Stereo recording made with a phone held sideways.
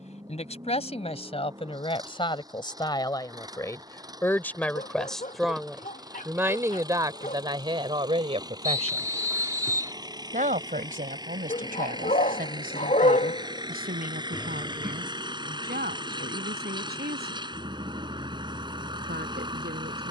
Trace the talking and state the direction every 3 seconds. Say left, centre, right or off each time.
left, centre, right, right, right, right, right.